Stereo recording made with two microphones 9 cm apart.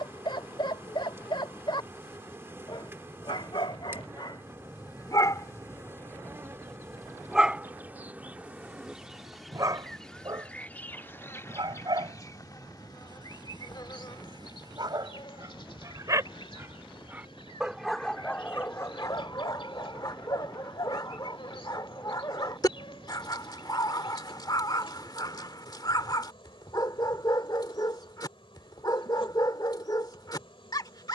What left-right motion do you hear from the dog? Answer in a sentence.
You can hear the dog move from left to right and back again.